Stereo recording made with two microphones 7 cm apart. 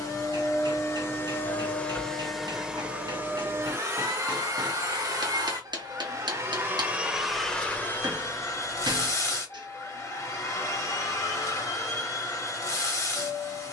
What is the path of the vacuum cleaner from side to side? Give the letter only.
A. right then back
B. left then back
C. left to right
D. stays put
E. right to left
A.